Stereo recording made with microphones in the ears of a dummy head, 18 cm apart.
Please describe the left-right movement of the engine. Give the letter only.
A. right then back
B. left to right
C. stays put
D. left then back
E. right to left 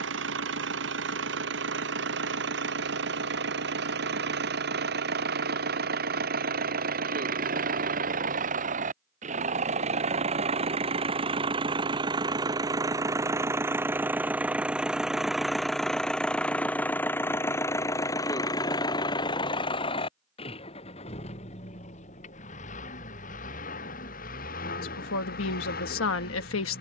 E.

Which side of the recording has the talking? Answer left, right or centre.
left.